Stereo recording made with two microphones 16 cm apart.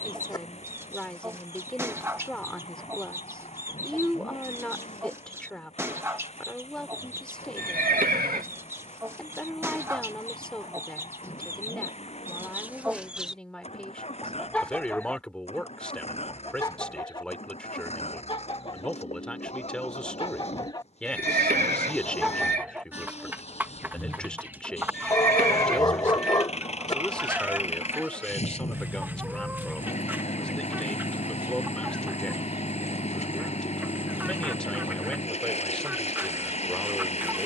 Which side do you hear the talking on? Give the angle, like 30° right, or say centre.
10° left.